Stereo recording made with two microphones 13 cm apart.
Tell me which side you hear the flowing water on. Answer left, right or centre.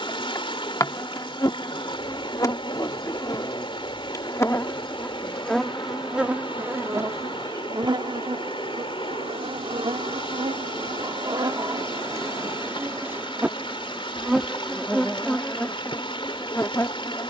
left.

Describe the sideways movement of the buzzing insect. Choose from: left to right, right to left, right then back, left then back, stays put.
right then back.